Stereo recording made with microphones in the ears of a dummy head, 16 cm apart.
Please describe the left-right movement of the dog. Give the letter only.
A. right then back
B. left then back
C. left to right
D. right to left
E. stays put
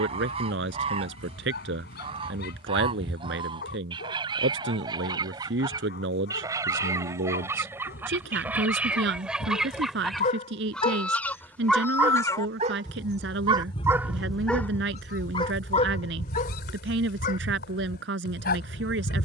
A.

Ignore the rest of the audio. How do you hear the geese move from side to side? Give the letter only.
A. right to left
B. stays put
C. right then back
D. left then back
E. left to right
A.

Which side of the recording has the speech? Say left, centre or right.
right.